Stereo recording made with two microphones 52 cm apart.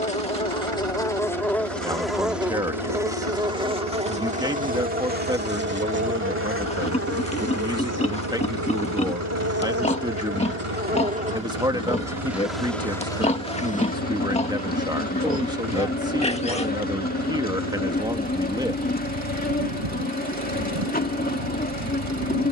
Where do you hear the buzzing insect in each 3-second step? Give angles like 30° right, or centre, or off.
centre, 10° right, 30° right, 20° right, 10° left, 20° left, 20° left, 20° left.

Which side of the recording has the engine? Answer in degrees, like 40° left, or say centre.
70° right.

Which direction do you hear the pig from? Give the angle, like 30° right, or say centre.
10° left.